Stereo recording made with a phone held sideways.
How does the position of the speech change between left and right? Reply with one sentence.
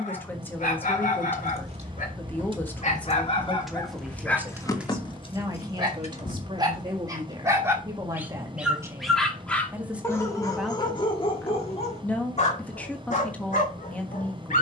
In this clip you hear the speech go right and come back.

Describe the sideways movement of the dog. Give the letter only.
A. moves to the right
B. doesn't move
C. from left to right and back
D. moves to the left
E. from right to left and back
C.